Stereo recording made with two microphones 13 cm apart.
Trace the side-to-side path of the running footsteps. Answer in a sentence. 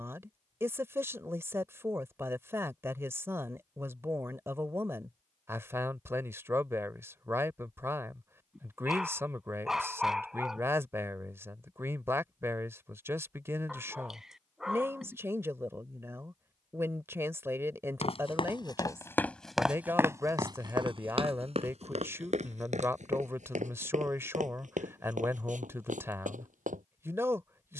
You can hear the running footsteps travel towards the right.